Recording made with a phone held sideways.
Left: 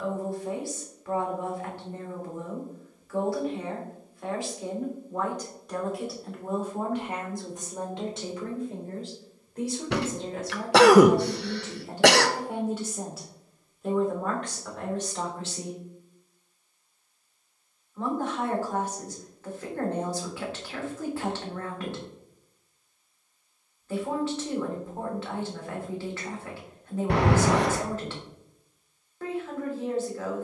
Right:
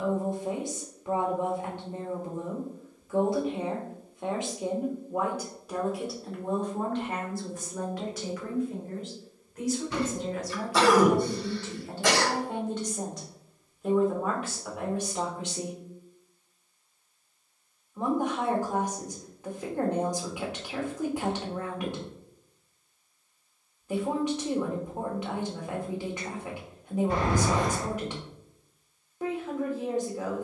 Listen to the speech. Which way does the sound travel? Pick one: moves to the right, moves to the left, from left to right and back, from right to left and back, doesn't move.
from right to left and back.